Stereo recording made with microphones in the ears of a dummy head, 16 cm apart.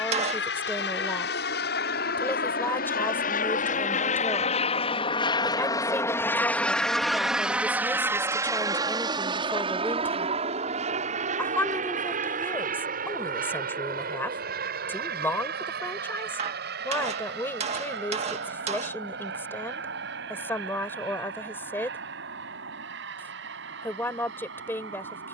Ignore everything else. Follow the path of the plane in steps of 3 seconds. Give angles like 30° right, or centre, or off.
60° left, 40° left, centre, 30° right, 50° right, 50° right, 60° right, 60° right, 60° right.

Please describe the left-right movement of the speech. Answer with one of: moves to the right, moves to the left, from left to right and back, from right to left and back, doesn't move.
doesn't move.